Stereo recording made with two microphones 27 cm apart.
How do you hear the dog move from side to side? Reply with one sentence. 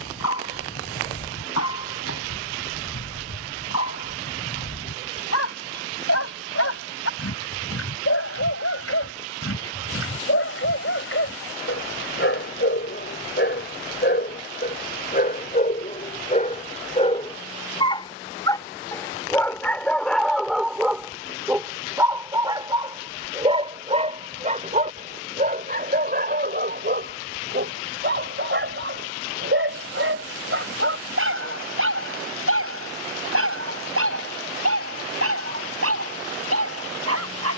You can hear the dog travel towards the right.